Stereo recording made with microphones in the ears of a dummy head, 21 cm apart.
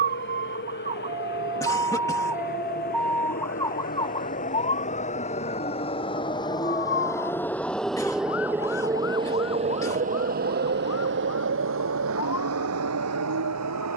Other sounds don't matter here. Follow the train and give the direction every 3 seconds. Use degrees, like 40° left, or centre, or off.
50° left, 30° left, 10° left, 40° right, 70° right.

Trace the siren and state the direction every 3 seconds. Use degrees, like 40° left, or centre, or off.
20° right, 20° left, 50° left, 60° left, 60° left.